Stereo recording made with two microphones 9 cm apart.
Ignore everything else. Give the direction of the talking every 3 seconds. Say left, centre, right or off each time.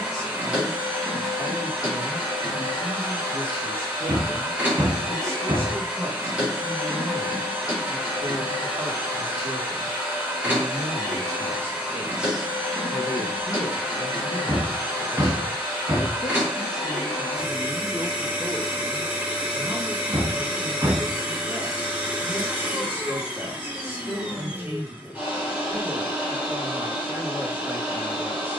right, right, right, right, left, left, centre, right, right, right.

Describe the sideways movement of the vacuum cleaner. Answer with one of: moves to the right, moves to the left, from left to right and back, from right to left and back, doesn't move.
doesn't move.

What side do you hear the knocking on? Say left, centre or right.
right.